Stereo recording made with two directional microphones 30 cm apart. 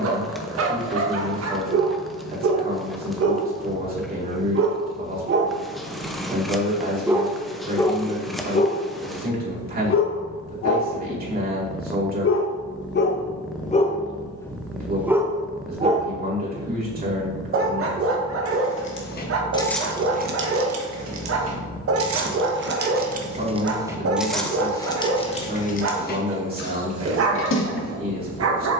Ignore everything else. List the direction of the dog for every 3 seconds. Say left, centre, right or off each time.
right, right, centre, left, left, right, right, right, right, right.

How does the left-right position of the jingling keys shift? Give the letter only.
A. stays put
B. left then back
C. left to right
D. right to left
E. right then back
E.